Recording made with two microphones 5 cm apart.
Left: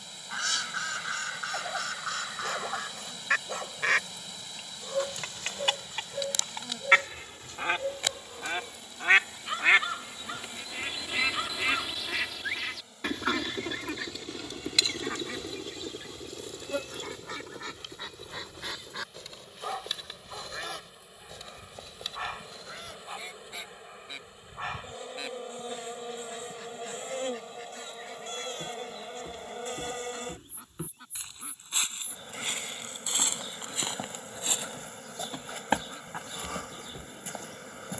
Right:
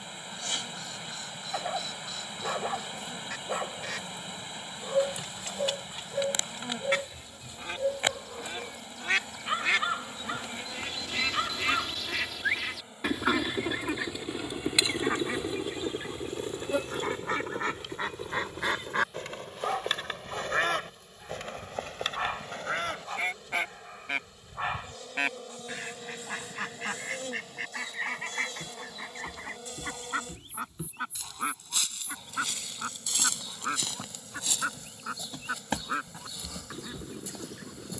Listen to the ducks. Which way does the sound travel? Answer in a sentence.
You can hear the ducks go from the left side to the right.